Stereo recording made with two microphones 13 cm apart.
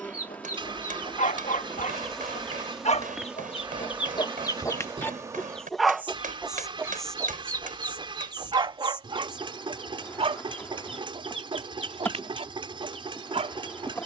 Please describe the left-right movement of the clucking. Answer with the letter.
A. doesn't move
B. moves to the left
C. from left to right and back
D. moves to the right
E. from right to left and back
D.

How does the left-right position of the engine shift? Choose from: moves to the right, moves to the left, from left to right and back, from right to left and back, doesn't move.
doesn't move.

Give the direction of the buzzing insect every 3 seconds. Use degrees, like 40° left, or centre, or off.
10° left, 10° right, 10° left, 20° left, 20° left.